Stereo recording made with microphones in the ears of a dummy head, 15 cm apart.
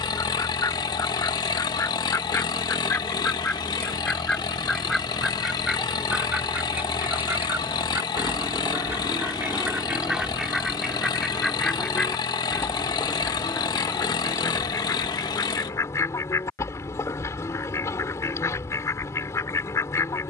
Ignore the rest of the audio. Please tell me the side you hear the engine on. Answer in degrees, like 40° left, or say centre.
20° left.